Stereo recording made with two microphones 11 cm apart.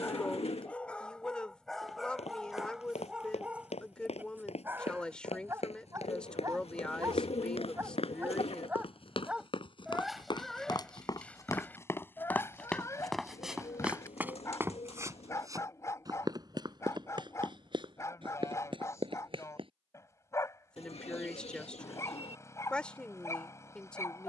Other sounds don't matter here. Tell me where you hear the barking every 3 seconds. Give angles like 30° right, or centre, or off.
10° left, 20° right, 20° right, centre, 30° left, 30° left, 30° left, 30° left.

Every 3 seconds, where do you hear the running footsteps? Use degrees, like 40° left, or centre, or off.
80° left, 80° left, 70° left, 40° left, centre, 40° right, 50° right, off.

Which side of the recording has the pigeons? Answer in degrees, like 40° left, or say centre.
70° left.